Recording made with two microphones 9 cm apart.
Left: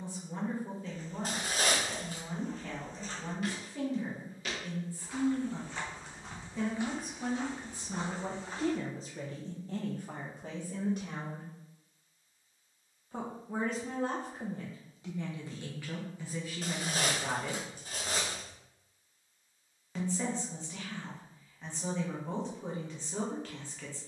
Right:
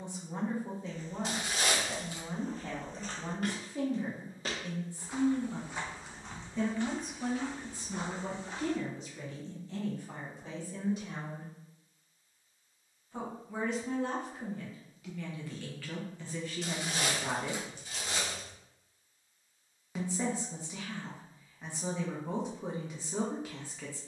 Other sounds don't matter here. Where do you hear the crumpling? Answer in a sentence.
In this clip you hear the crumpling on the left.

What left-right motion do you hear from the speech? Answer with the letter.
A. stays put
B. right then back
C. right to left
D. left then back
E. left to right
D.